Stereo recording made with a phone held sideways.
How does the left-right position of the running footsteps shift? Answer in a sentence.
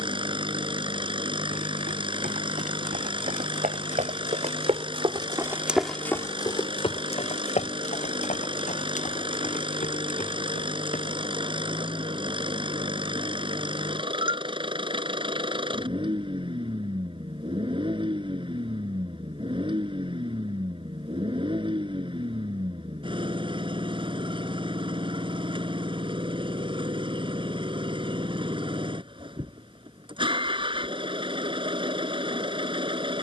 In this clip you hear the running footsteps travel towards the left.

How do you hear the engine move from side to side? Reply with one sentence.
You can hear the engine stay in one place.